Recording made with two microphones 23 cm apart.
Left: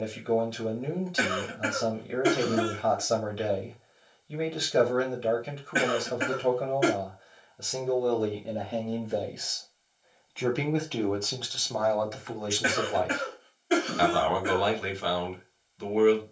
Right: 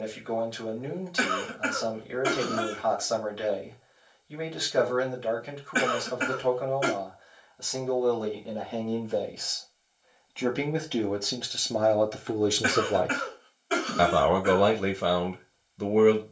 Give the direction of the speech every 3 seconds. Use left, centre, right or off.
left, left, left, centre, right, right.